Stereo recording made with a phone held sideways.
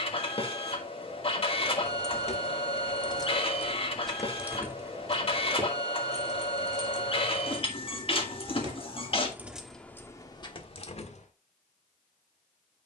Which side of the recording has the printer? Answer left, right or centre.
left.